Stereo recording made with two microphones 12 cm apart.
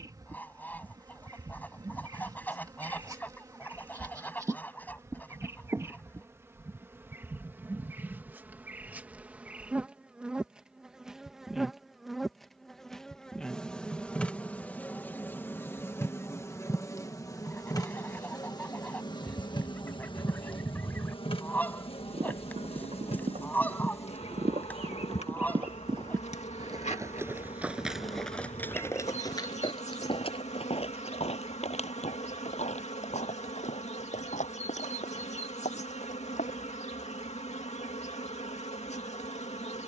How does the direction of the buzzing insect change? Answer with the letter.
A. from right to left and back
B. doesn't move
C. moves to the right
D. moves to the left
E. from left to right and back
D.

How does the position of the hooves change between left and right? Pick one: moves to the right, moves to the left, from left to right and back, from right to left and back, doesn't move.
moves to the left.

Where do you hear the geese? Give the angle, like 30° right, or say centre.
10° left.